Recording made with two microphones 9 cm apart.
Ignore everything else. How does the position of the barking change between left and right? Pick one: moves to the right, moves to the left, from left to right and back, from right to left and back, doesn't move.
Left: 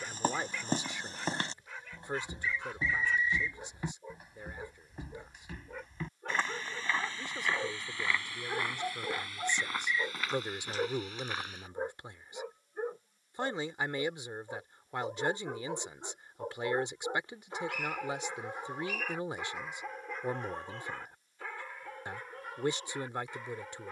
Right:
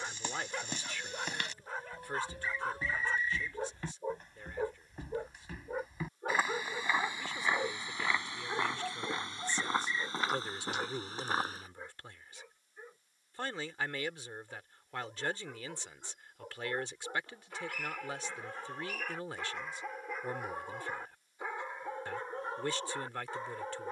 from right to left and back.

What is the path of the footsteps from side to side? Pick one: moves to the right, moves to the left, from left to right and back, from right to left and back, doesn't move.
moves to the right.